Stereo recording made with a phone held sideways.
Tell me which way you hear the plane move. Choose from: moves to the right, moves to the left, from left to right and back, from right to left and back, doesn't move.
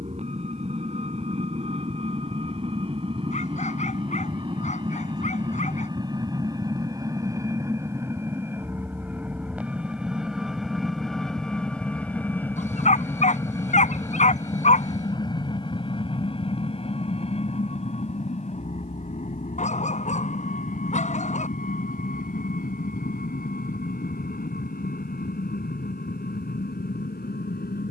moves to the left.